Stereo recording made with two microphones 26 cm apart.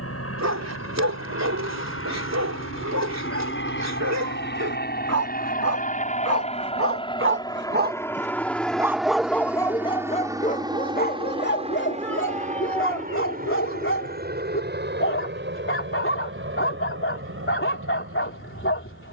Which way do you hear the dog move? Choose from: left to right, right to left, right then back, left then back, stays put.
right to left.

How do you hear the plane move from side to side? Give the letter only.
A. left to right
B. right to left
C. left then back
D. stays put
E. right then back
A.